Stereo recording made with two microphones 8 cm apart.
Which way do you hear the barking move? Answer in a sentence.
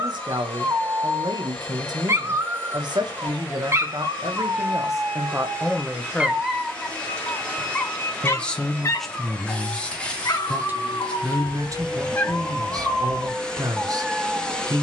In this clip you hear the barking move from right to left and back again.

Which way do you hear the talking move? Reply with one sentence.
You can hear the talking move from right to left and back again.